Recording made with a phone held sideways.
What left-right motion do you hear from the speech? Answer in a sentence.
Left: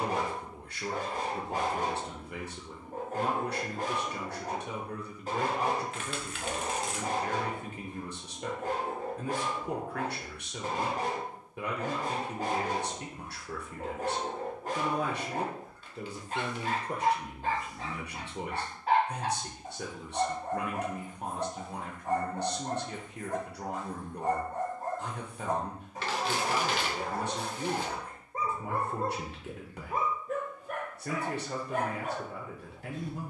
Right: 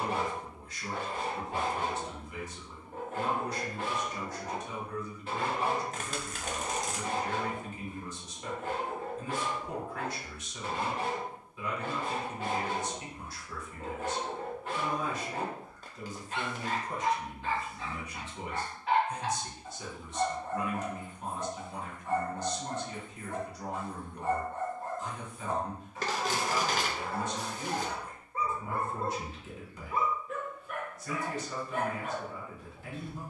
In this clip you hear the speech stay in one place.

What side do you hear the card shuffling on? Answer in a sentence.
You can hear the card shuffling on the right.